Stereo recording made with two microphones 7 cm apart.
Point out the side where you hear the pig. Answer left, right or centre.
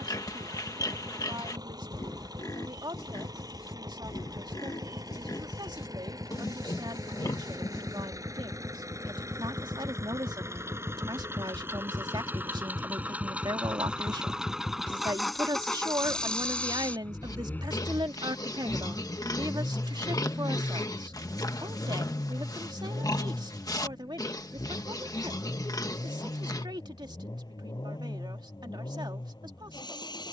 left.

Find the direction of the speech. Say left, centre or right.
right.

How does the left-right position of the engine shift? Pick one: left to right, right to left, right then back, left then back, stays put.
right to left.